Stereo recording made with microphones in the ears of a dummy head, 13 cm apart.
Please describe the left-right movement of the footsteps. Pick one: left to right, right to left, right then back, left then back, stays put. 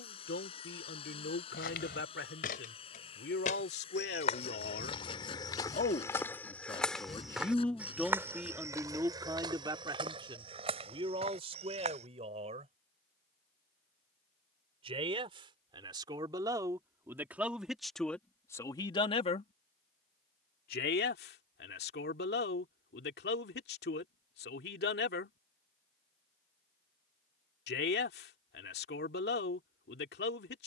left to right.